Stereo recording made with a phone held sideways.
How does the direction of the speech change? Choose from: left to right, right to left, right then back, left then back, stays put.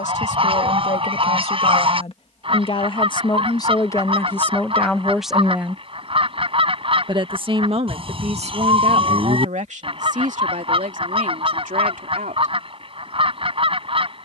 left to right.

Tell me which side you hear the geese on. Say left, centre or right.
right.